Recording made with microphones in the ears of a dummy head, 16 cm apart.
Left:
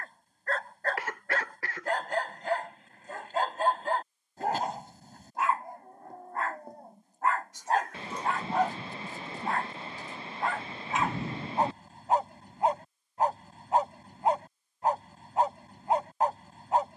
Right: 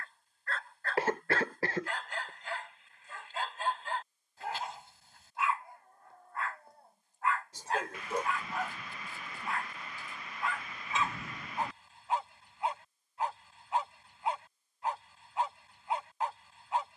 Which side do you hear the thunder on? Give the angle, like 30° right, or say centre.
30° left.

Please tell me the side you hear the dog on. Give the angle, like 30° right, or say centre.
40° left.